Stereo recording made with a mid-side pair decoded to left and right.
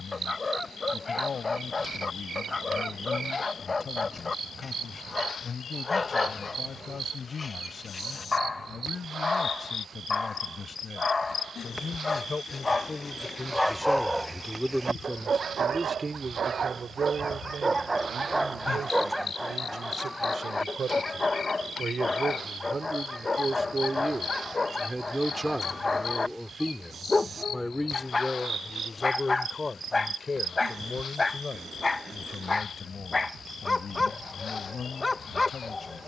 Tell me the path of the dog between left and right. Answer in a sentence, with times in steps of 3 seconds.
In this clip you hear the dog on the left from 0 s, in the centre from 12 s, on the right from 15 s, in the centre from 18 s and on the left from 21 s.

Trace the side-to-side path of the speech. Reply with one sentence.
You can hear the speech go right and come back.